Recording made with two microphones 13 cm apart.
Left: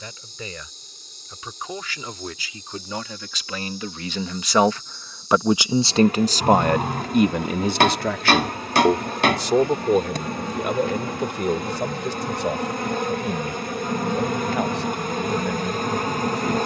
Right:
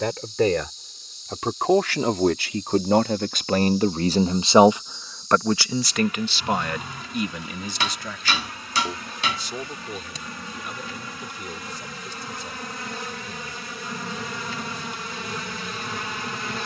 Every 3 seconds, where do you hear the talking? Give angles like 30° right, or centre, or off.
70° right, 20° right, 50° left, 70° left, 80° left, 80° left.